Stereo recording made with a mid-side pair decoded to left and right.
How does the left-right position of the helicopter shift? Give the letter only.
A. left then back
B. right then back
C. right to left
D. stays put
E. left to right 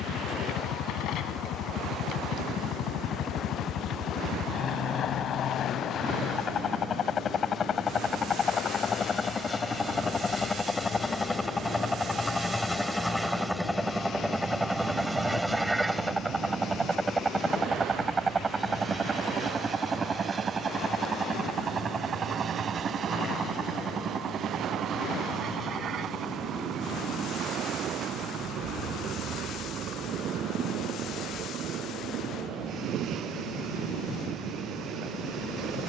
E.